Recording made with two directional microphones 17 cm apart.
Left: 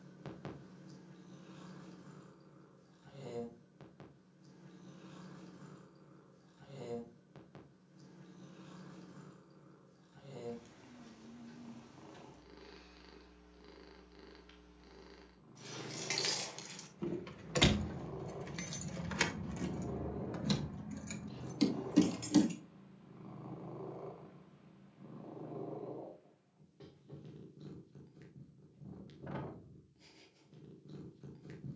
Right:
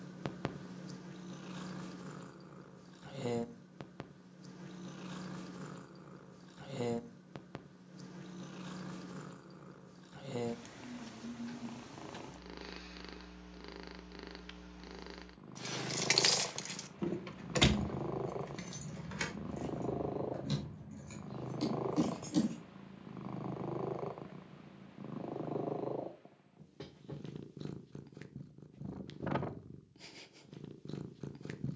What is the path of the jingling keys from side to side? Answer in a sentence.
In this clip you hear the jingling keys travel towards the left.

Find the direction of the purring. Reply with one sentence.
You can hear the purring on the right.